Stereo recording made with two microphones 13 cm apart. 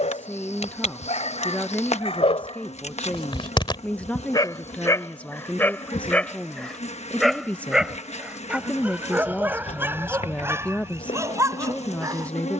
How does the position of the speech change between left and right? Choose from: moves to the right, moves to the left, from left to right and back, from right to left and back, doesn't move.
doesn't move.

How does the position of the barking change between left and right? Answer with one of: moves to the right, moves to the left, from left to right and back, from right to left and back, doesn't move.
moves to the right.